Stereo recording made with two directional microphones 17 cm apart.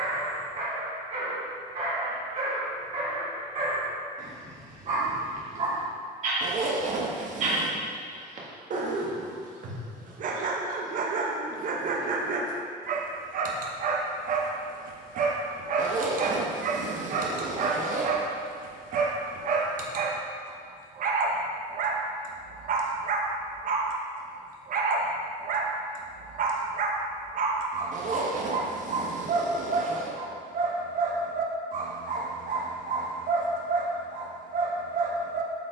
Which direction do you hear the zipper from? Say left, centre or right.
right.